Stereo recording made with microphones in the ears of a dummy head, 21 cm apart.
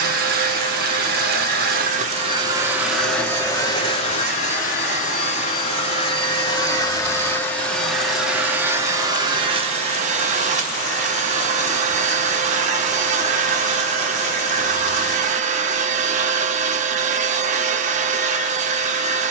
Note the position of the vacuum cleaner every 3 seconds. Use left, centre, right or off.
right, left, centre, right, right, right, right.